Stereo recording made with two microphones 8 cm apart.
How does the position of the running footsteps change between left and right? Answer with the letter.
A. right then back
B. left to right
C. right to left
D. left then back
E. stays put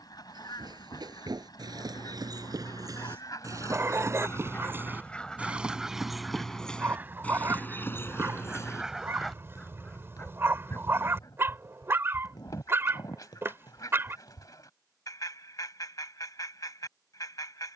C.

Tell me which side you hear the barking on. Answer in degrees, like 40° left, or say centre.
30° right.